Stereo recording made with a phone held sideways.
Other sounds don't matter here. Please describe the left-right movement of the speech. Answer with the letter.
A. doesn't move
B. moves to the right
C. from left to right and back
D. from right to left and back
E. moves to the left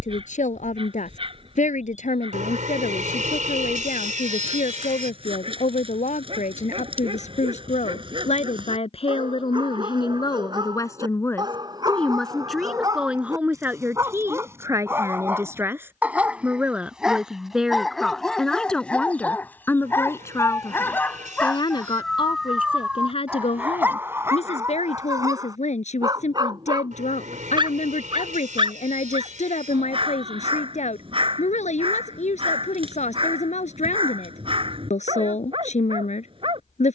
C.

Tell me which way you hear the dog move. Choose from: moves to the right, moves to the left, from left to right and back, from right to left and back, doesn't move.
from right to left and back.